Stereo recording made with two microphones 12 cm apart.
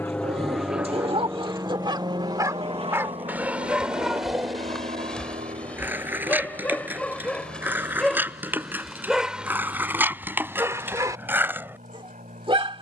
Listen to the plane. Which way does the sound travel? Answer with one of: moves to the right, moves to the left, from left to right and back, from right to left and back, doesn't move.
moves to the right.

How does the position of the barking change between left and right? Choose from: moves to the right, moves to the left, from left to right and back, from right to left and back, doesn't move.
from right to left and back.